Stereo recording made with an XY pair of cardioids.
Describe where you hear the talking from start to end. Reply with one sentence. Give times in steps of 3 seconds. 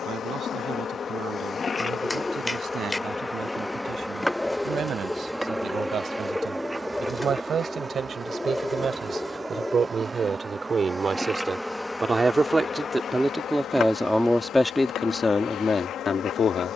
In this clip you hear the talking on the right from 0 s, in the centre from 12 s and on the left from 15 s.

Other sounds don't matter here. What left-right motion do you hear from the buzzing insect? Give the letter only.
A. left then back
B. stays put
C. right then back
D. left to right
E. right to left
C.